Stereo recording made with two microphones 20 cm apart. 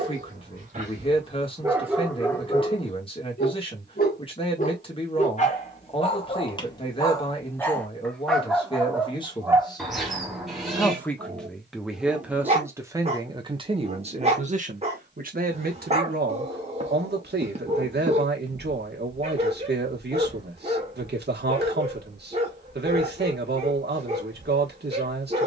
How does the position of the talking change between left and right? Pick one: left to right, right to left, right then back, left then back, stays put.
left to right.